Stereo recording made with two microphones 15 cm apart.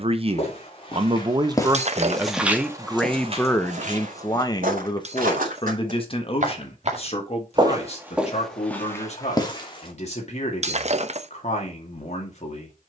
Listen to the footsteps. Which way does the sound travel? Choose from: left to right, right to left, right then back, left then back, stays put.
right then back.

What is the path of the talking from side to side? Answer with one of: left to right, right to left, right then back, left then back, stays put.
right to left.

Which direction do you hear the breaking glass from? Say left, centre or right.
right.